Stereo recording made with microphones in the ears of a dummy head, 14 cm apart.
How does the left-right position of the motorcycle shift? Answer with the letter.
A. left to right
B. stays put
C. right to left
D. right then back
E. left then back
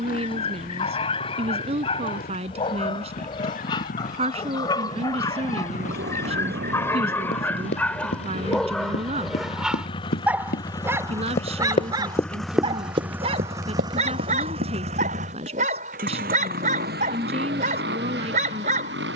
A.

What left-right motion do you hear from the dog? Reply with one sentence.
In this clip you hear the dog move to the right.